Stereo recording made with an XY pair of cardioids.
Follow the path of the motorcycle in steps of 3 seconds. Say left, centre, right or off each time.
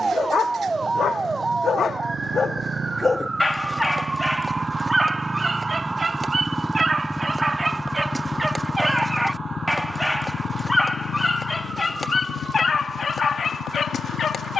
right, right, centre, left, left.